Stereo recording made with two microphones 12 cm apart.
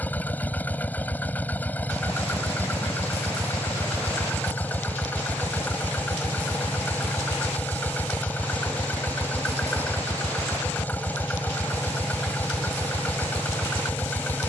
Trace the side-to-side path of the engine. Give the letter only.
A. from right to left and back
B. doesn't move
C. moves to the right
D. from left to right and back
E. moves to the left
B.